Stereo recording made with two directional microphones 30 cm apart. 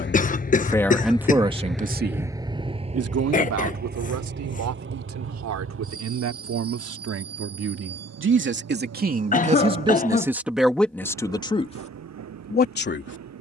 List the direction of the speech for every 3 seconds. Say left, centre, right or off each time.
centre, right, right, centre, left.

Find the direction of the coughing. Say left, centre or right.
left.